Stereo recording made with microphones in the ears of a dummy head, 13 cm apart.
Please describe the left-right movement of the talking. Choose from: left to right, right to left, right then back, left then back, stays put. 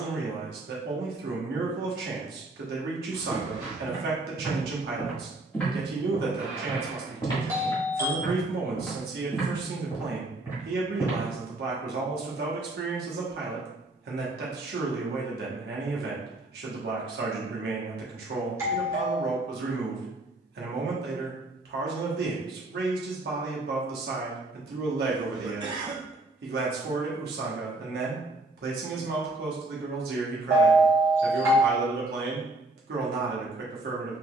stays put.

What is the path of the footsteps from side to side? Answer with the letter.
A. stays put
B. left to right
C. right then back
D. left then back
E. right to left
D.